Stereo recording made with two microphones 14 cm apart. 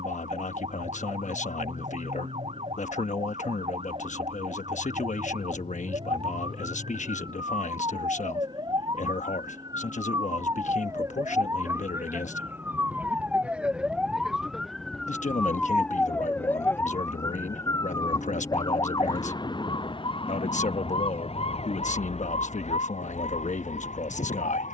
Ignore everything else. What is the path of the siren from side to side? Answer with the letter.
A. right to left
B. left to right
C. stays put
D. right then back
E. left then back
A.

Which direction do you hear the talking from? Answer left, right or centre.
left.